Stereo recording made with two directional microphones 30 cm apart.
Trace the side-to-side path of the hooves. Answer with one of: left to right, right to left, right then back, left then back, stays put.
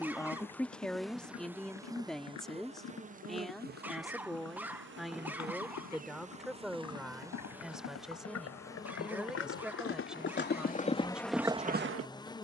left to right.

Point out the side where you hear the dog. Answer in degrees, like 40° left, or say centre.
10° right.